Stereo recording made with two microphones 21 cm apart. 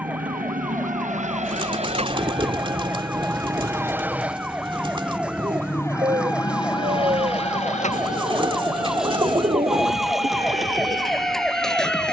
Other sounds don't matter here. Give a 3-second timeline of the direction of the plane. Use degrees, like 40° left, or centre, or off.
40° right, centre, 30° left, 50° left.